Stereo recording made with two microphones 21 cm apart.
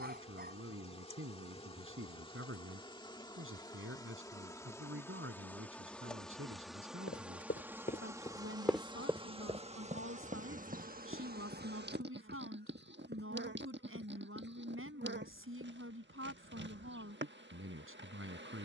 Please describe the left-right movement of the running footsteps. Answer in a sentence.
In this clip you hear the running footsteps go from the left side to the right.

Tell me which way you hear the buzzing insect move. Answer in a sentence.
You can hear the buzzing insect move to the right.